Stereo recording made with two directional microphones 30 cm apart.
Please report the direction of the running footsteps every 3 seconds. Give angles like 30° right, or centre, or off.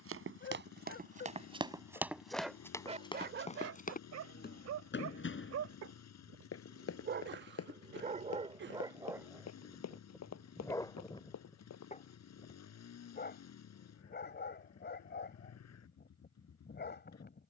20° right, 30° left, 50° left, 60° left, off, off.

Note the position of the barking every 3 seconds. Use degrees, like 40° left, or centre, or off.
20° left, 50° right, 30° right, 10° left, 30° left, 30° left.